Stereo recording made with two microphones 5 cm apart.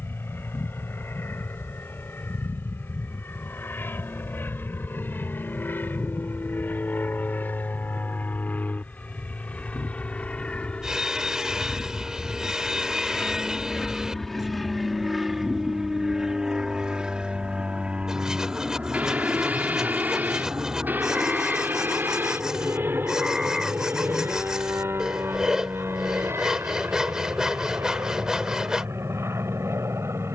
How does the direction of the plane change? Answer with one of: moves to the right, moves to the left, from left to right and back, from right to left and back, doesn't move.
moves to the right.